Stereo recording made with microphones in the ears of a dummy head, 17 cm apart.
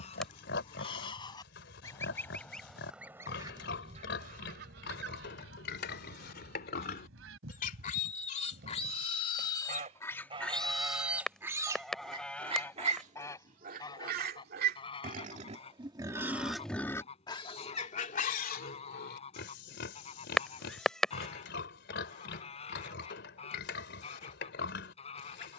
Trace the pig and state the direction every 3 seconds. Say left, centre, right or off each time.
left, left, left, centre, right, centre, left, left, left.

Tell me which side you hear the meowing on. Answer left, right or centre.
centre.